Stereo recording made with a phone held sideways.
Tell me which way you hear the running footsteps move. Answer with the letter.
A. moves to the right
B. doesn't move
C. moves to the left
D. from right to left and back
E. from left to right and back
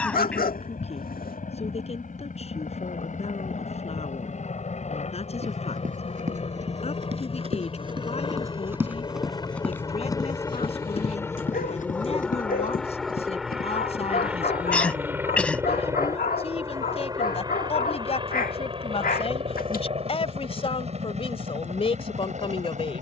C.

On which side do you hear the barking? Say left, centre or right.
left.